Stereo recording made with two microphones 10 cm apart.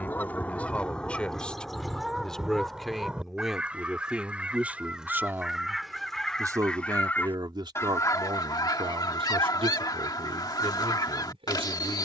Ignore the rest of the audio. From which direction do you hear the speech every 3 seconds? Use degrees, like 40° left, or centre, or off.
10° left, 10° right, 50° right, 80° right.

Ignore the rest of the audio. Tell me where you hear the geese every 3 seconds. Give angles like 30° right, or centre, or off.
10° left, 10° right, 30° left, 40° left.